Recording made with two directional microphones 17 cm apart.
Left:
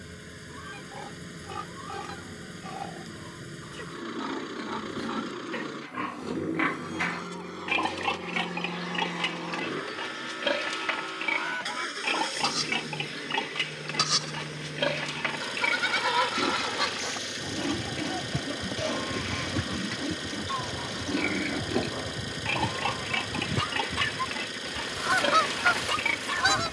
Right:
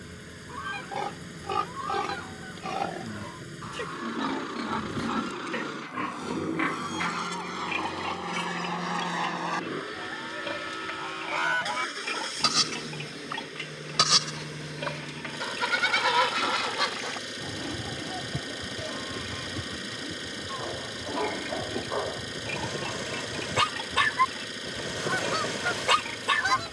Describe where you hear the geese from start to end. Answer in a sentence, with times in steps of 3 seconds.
You can hear the geese on the right from 0 s, in the centre from 15 s and on the left from 18 s.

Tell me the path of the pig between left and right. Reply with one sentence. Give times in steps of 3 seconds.
In this clip you hear the pig on the right from 0 s and on the left from 6 s.